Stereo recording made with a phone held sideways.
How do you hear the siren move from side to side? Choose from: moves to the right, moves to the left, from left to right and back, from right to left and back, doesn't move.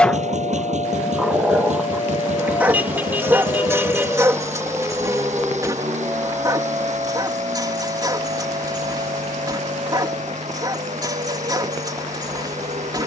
moves to the right.